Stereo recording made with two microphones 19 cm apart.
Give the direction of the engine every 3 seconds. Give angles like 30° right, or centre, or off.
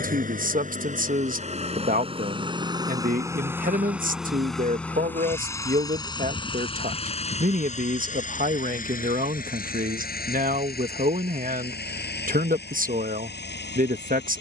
40° right, centre, 40° left, 50° left, 60° left.